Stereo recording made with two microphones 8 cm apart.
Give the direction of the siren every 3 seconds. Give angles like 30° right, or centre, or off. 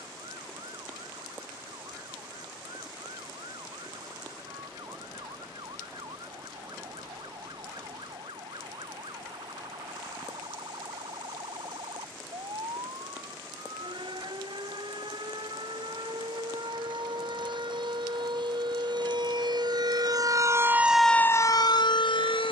80° right, 80° right, 80° right, 80° right, 80° right, 70° right, 50° right, 50° left.